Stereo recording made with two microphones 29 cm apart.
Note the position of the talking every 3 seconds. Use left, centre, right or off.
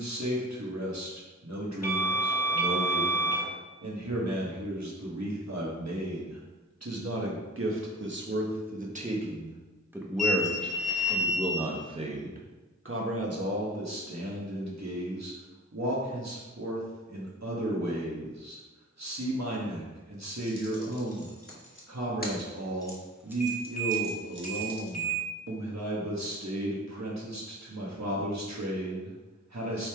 right, right, right, centre, right, right, right, right, right, right.